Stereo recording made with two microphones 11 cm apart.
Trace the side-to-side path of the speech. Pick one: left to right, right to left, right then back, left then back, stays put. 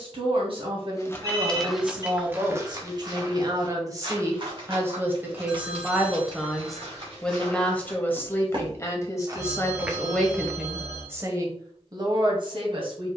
left then back.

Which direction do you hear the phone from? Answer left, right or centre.
right.